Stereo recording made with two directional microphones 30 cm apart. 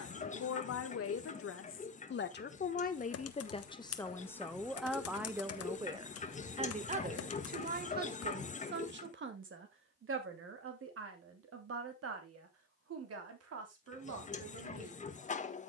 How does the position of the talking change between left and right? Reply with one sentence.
You can hear the talking move to the right.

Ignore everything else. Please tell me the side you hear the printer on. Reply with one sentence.
In this clip you hear the printer on the left.